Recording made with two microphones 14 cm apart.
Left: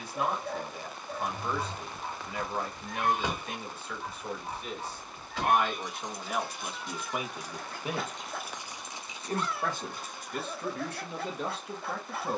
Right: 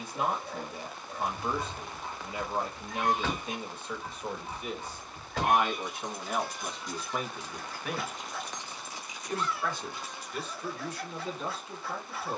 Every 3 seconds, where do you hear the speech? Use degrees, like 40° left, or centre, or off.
20° right, 10° right, 10° left, 50° left.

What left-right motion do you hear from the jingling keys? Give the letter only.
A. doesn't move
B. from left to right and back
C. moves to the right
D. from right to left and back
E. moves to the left
B.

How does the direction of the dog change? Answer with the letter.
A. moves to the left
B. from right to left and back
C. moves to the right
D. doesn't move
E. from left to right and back
D.